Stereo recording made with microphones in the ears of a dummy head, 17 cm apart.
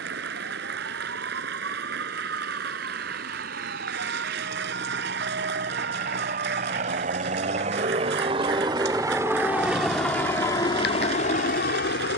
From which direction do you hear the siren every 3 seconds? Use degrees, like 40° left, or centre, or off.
70° right, 60° right, 40° right, 40° left.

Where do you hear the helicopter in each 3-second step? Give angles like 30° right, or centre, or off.
60° right, 50° right, 40° right, 20° left.